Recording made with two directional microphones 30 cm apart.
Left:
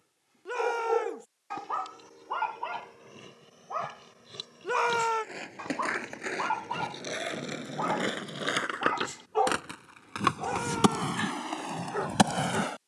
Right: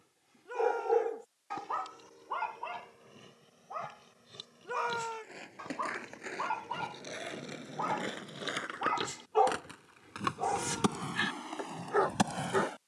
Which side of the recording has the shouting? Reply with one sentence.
In this clip you hear the shouting on the left.